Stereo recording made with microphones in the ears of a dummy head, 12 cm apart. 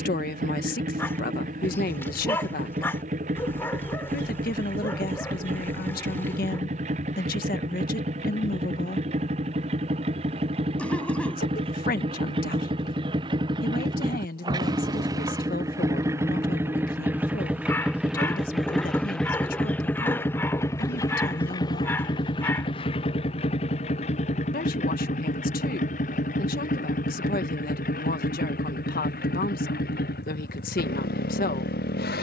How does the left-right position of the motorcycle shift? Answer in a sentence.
In this clip you hear the motorcycle move from right to left.